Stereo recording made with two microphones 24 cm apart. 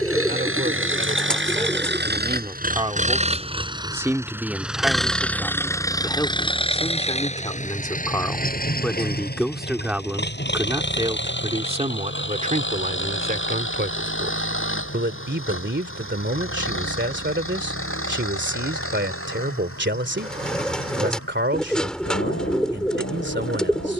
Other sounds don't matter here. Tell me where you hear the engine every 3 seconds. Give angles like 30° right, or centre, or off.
50° right, 10° right, 30° left, 50° left, 50° left, 60° left, 60° left, 60° left.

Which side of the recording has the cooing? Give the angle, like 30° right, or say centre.
centre.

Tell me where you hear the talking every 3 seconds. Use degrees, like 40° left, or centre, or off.
30° right, centre, 20° left, 10° right, 40° right, 50° right, 50° right, 50° right.